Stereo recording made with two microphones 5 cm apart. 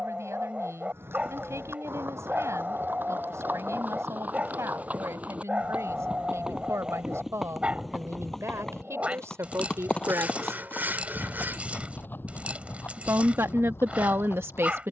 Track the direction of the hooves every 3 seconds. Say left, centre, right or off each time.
right, right, centre, left, left.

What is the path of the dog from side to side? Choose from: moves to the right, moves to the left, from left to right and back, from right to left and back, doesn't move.
doesn't move.